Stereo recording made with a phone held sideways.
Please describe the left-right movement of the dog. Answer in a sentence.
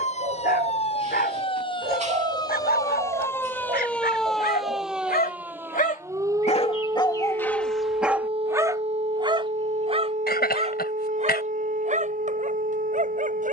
You can hear the dog go from the left side to the right.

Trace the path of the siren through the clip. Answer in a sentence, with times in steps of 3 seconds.
You can hear the siren on the left from 0 s, in the centre from 3 s and on the right from 6 s.